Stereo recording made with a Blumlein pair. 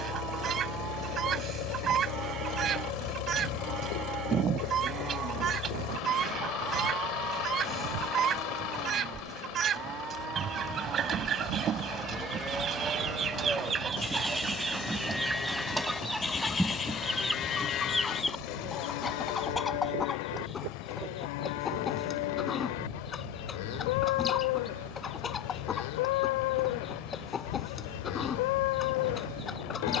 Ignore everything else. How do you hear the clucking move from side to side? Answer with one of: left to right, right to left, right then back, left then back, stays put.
right to left.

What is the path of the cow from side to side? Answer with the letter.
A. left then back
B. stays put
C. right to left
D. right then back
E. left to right
C.